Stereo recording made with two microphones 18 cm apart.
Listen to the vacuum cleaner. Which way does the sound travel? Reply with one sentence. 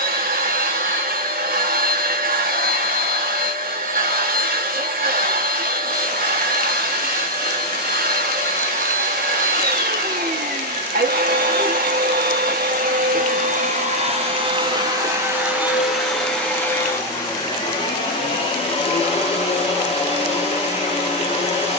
You can hear the vacuum cleaner move from right to left.